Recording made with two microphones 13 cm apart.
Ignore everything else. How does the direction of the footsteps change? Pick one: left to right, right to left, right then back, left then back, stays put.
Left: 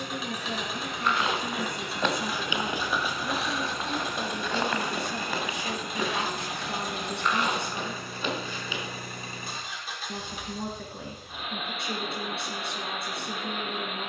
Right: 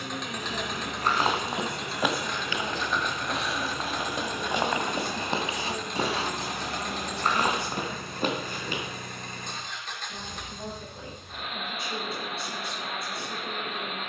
left then back.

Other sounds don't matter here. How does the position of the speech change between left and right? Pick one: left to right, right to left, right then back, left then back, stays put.
stays put.